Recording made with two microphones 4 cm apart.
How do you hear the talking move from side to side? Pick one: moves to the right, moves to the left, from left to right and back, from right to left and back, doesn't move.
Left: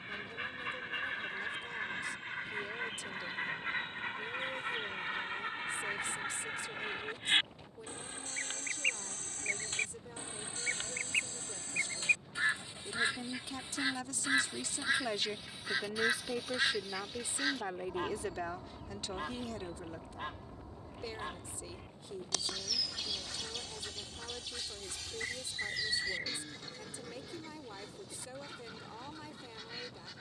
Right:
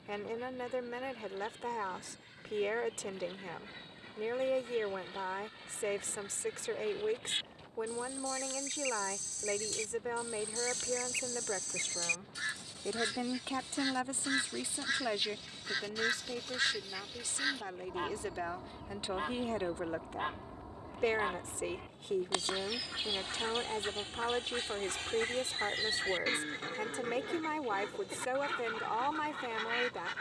from right to left and back.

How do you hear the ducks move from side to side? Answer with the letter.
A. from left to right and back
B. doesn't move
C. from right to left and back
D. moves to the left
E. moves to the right
E.